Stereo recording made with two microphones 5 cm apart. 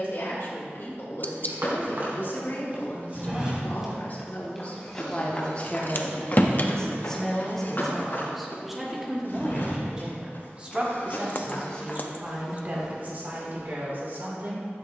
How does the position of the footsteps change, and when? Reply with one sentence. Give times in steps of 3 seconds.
You can hear the footsteps on the right from 0 s, in the centre from 3 s, on the left from 6 s and on the right from 12 s.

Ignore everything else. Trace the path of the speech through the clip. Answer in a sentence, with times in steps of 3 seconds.
In this clip you hear the speech on the left from 0 s, in the centre from 6 s and on the right from 9 s.